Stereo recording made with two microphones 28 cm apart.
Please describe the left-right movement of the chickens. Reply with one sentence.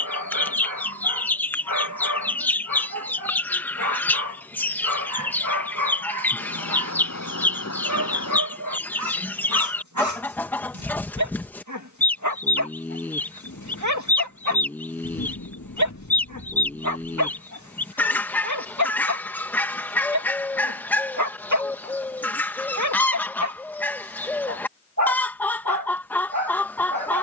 You can hear the chickens stay put.